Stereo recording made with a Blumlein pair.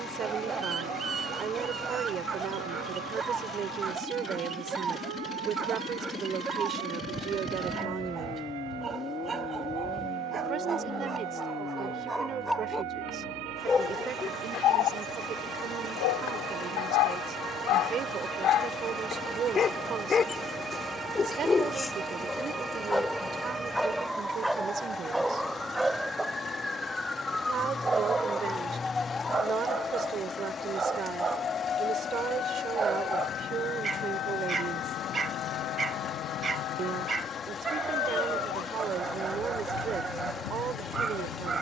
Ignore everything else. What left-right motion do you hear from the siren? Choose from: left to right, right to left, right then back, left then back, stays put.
right to left.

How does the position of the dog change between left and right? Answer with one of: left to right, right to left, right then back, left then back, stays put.
left then back.